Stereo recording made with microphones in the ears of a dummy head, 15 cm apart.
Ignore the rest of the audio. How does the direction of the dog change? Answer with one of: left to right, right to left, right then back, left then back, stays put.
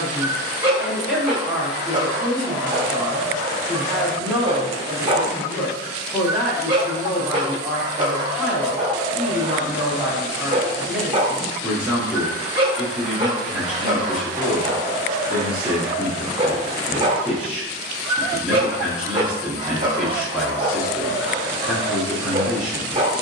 stays put.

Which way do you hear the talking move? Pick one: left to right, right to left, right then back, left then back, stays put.
stays put.